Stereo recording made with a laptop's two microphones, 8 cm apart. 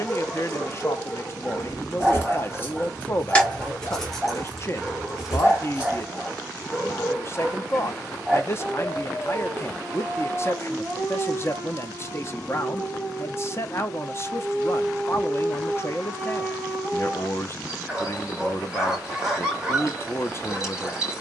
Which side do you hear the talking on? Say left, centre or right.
left.